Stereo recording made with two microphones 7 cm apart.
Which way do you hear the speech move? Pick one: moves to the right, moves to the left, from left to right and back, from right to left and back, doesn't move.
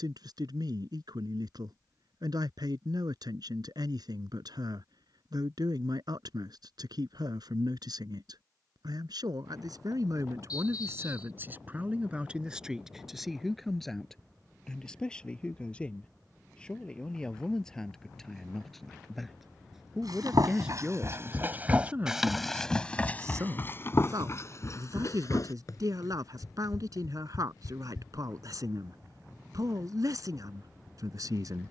from right to left and back.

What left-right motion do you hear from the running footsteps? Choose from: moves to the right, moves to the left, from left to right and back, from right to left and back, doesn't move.
moves to the left.